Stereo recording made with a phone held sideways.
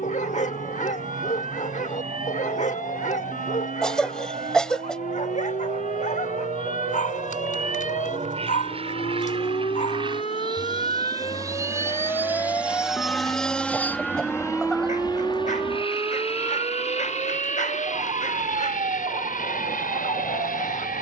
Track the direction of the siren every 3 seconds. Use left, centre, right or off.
left, left, left, left, centre, right, right.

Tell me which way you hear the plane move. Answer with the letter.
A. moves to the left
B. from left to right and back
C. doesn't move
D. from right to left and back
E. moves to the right
A.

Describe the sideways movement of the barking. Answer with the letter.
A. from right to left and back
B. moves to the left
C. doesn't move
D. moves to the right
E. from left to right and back
C.